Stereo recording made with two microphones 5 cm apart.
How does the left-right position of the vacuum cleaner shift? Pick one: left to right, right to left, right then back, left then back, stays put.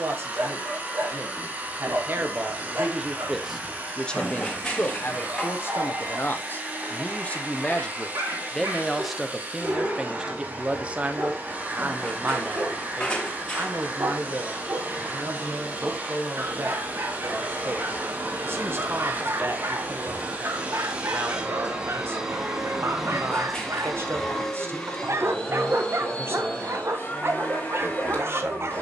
right to left.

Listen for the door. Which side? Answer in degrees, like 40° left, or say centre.
20° left.